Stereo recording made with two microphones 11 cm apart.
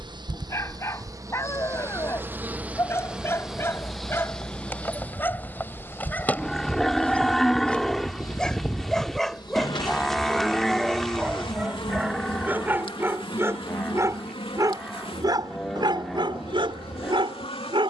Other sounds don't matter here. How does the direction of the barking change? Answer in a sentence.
You can hear the barking move from left to right.